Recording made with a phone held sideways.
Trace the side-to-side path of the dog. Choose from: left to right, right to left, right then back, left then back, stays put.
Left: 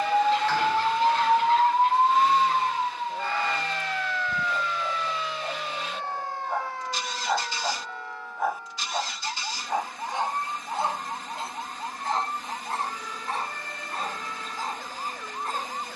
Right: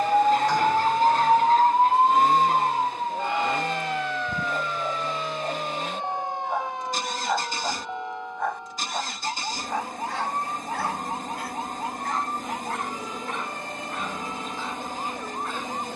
right to left.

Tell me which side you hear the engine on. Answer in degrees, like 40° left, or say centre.
50° right.